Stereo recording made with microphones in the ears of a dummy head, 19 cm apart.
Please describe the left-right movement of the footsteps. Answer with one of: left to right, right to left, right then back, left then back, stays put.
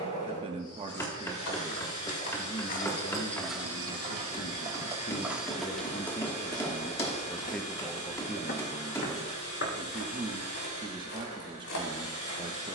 right then back.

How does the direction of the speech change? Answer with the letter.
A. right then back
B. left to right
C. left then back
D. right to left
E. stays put
C.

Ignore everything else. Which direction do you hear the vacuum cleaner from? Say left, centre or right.
left.